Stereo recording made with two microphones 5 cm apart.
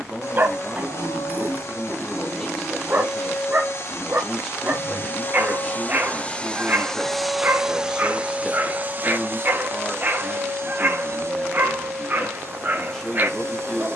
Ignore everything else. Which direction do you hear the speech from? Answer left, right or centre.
centre.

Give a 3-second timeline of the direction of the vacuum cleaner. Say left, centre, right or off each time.
left, left, centre, right, right.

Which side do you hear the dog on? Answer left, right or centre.
right.